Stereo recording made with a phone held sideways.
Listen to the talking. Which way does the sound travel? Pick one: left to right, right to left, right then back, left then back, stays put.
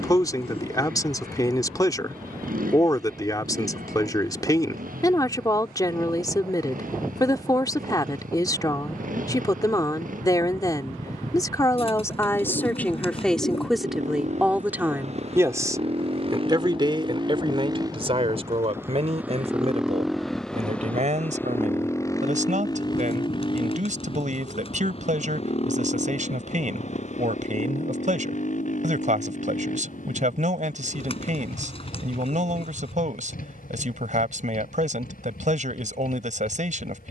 left to right.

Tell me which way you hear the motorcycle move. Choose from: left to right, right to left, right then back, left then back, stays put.
right to left.